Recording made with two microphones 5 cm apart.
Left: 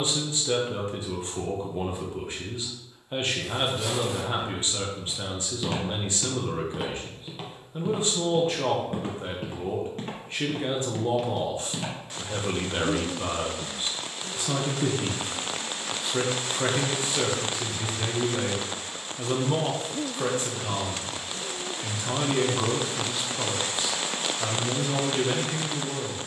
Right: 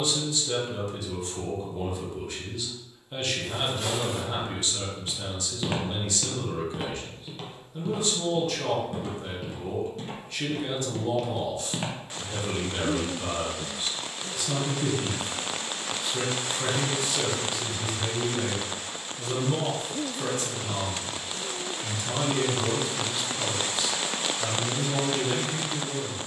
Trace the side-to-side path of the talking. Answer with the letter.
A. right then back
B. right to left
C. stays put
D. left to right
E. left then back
C.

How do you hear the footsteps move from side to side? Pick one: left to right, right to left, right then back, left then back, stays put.
left then back.